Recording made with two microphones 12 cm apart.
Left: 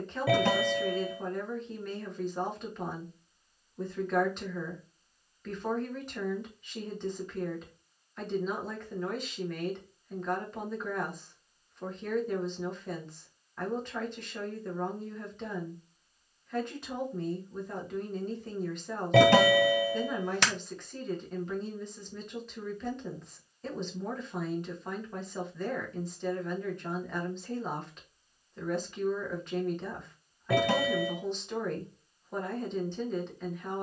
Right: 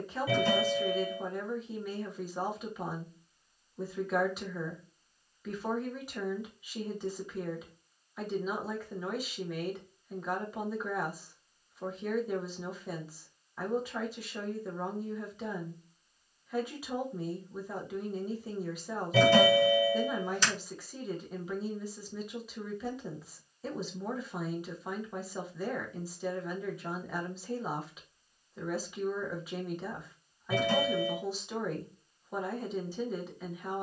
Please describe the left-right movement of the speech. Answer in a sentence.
You can hear the speech stay in one place.